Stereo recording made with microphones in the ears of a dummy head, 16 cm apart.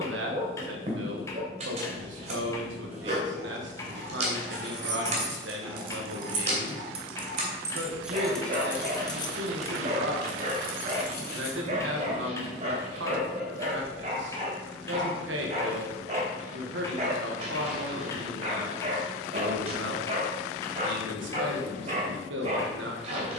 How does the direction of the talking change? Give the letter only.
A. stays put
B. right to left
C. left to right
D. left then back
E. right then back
A.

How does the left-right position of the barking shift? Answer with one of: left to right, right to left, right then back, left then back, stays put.
stays put.